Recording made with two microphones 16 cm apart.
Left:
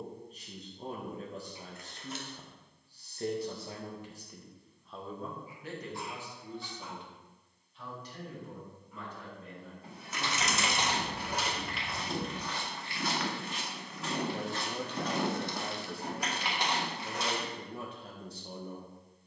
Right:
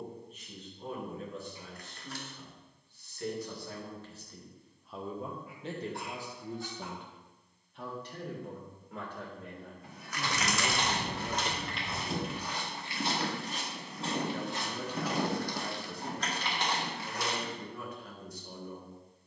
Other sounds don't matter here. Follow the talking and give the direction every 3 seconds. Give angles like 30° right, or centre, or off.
40° left, 10° left, 50° right, 50° right, 10° left, 30° left, 30° left.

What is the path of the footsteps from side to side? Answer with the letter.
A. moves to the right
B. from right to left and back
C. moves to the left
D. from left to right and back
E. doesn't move
D.